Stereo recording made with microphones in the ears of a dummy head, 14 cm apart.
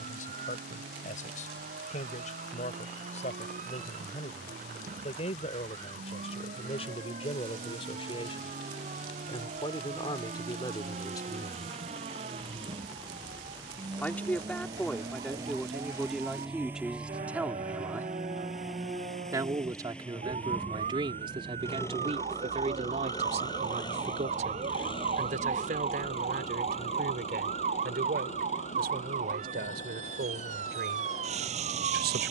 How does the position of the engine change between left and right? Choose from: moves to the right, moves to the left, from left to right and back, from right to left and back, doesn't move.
moves to the left.